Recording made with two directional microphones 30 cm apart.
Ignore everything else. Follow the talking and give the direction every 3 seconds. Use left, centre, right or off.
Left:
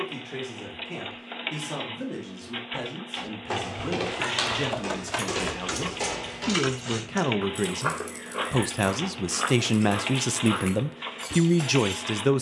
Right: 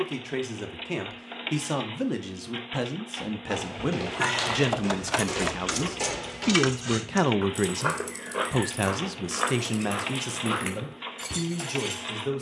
right, right, centre, left.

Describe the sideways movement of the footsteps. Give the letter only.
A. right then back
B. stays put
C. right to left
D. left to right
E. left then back
D.